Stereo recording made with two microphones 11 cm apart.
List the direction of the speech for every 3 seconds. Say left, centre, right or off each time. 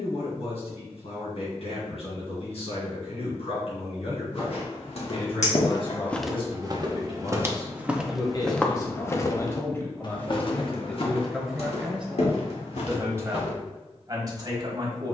left, left, left, centre, right.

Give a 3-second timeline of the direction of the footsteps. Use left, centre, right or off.
off, left, centre, left, left.